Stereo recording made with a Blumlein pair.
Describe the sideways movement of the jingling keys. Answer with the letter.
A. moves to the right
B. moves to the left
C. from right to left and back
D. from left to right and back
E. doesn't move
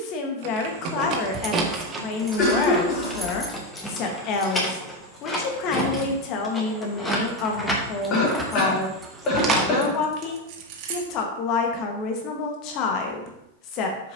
C.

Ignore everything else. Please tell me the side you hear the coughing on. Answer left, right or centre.
left.